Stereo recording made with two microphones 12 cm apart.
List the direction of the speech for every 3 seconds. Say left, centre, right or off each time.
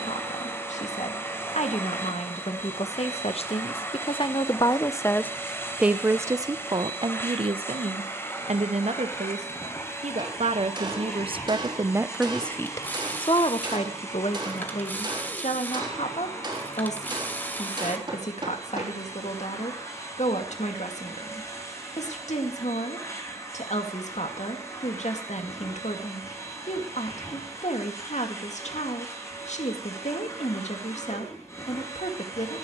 left, left, right, right, left, left, left, left, left, left, left.